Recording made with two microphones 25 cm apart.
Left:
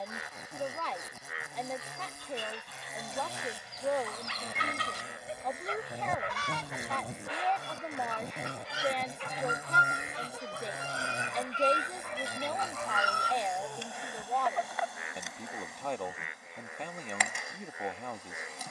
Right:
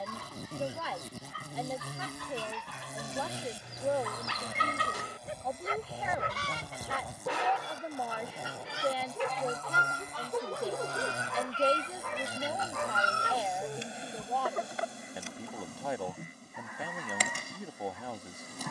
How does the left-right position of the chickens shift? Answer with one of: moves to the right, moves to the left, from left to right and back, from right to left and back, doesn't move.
from right to left and back.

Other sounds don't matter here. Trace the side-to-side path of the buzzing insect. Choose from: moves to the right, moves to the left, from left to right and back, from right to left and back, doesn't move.
from right to left and back.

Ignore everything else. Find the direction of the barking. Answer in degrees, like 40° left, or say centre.
70° right.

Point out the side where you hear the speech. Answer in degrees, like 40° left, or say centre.
10° right.